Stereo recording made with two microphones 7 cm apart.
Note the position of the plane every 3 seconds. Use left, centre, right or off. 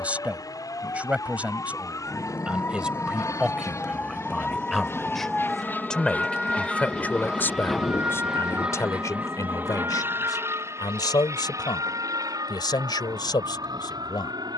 left, left, centre, right, right.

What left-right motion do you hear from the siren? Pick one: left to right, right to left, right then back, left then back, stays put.
left to right.